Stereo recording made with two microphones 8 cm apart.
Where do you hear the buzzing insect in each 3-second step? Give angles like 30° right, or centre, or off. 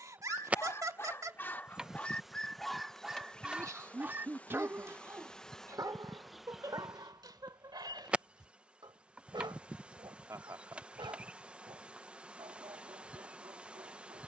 10° right, 10° left, 10° right, 10° right, 10° right.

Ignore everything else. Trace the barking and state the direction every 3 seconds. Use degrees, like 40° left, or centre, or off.
20° left, 20° right, 50° right, 70° right, 70° right.